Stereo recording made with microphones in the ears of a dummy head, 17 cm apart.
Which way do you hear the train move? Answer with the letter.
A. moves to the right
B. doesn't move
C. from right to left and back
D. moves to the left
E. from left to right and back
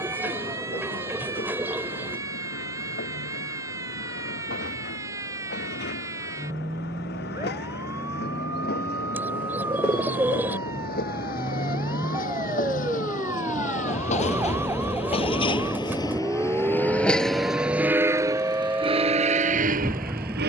A.